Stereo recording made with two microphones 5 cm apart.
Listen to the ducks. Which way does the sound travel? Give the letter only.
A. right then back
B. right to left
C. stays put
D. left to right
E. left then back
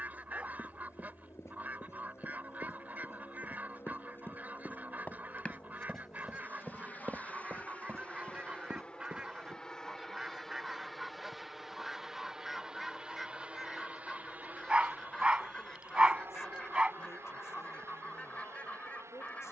B.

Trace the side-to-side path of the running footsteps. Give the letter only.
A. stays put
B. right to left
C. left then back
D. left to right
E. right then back
D.